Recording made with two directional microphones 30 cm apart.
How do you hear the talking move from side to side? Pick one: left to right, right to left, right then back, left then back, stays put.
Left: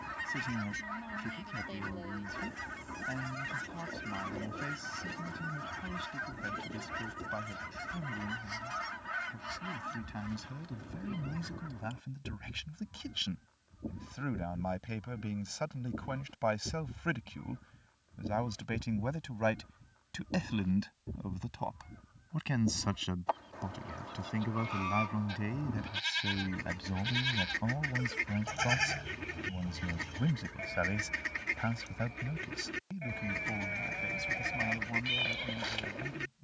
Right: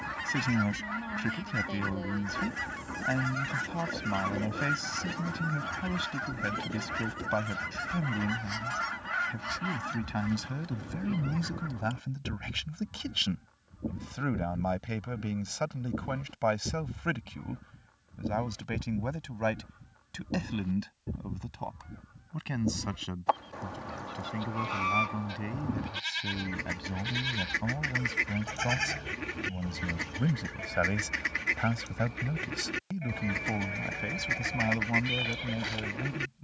left then back.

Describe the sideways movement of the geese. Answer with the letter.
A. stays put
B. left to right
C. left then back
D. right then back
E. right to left
A.